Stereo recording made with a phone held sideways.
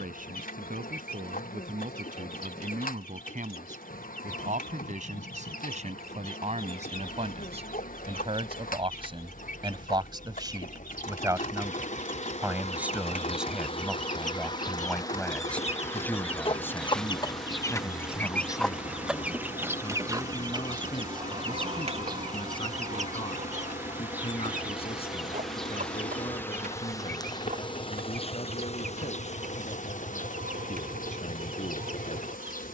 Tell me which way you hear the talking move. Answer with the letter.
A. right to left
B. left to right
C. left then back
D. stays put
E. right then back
A.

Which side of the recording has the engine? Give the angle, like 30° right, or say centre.
60° left.